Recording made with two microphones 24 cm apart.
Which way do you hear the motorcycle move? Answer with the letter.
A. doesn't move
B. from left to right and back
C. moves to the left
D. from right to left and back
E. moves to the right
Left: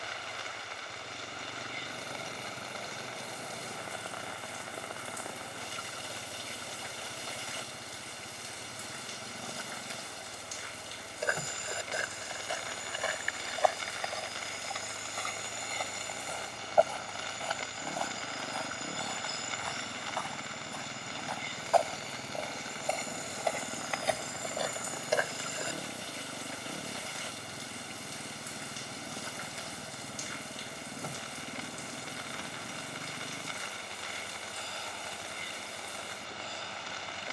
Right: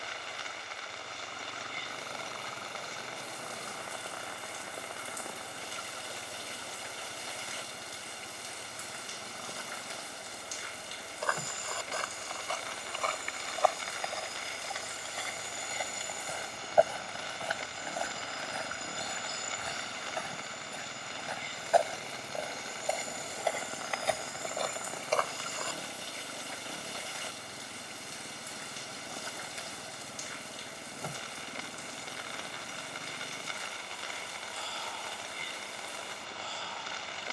A.